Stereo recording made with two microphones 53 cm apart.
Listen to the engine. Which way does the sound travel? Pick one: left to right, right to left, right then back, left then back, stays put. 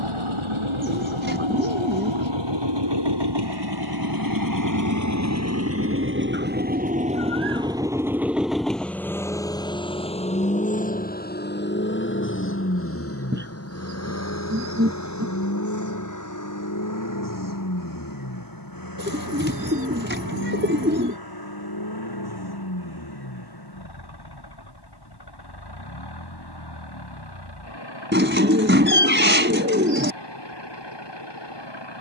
right to left.